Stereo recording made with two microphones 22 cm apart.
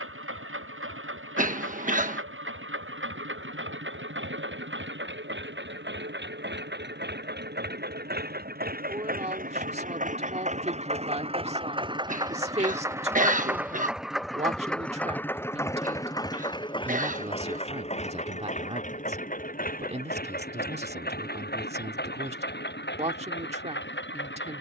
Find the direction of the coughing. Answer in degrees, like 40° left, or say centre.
40° right.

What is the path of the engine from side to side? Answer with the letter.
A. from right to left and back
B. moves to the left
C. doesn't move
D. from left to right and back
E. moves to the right
B.